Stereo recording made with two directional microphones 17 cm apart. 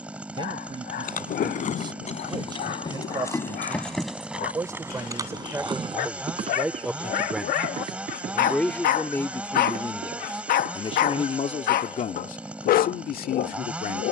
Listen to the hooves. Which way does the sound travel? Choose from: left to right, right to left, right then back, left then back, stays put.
left to right.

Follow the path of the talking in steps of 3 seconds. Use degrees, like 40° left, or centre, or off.
30° right, 20° right, centre, 30° left, 60° left.